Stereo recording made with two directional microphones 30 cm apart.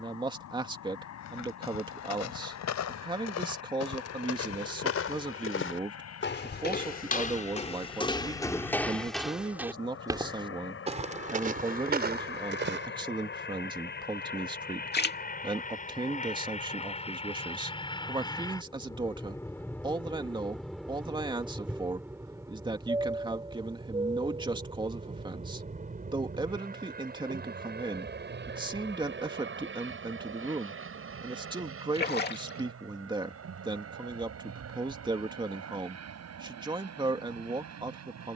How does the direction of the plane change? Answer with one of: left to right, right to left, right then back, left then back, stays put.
left to right.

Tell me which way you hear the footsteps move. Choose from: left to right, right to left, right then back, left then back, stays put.
left to right.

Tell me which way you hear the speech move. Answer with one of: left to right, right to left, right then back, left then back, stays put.
stays put.